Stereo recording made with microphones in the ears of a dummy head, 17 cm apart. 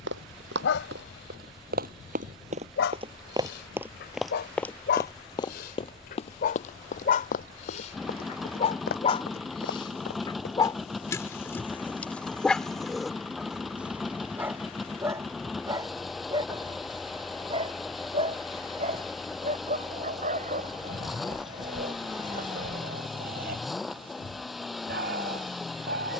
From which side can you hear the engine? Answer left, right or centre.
centre.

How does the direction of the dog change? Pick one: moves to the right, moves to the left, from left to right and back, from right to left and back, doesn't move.
moves to the right.